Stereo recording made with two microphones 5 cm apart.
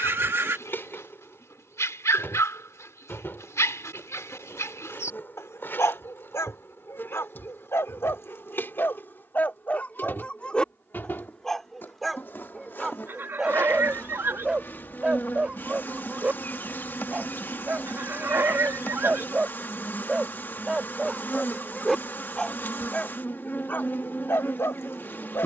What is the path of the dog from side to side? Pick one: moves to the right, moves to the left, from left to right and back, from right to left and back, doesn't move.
from left to right and back.